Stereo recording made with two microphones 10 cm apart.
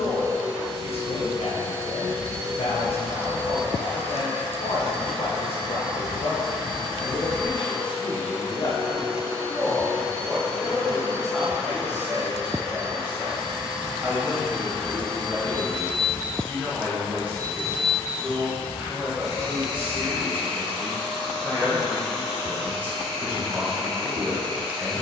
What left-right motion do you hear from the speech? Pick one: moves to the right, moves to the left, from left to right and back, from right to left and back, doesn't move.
moves to the right.